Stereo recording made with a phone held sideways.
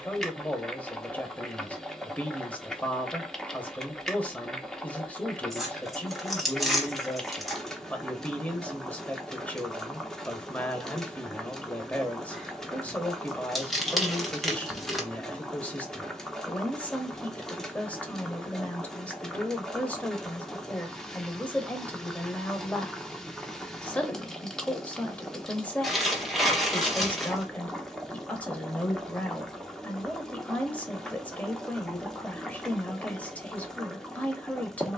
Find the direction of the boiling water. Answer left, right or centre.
centre.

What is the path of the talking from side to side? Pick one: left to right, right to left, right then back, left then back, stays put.
stays put.